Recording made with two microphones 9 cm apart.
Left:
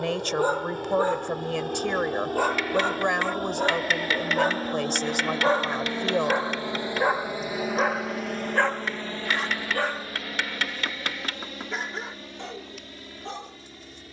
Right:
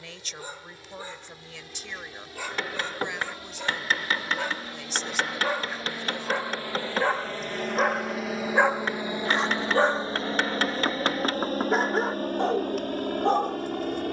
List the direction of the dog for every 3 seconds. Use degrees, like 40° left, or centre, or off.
60° left, 40° left, centre, 40° right, 50° right.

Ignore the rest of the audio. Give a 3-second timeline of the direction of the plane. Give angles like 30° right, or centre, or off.
60° left, 50° left, 10° left, 30° right, 50° right.